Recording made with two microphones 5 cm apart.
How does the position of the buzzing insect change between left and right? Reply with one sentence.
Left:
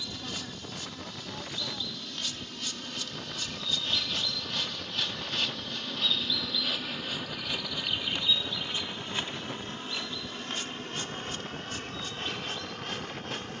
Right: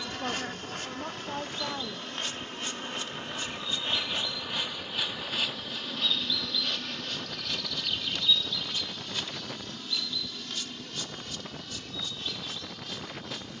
In this clip you hear the buzzing insect move from right to left.